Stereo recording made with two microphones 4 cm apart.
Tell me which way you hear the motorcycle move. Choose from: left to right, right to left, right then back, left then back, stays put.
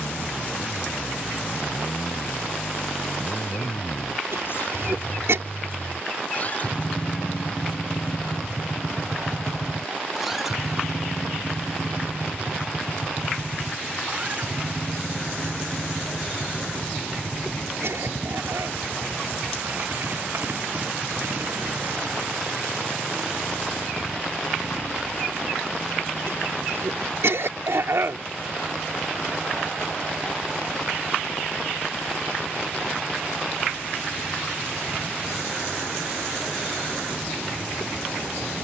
left to right.